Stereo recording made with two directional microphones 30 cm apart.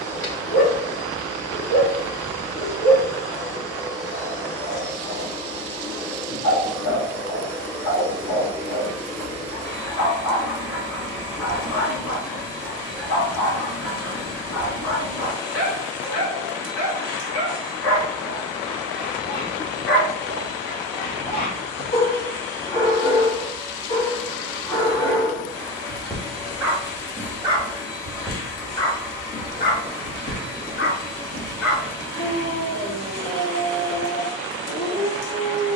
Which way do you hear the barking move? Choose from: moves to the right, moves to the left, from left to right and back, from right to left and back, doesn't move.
from left to right and back.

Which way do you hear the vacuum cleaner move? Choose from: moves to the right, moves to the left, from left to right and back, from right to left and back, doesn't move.
doesn't move.